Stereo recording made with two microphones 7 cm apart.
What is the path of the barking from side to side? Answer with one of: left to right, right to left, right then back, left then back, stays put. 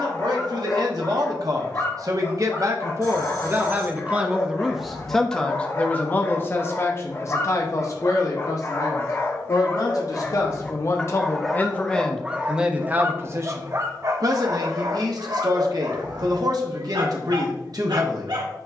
left to right.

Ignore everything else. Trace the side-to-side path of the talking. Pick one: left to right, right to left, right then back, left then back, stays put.
left then back.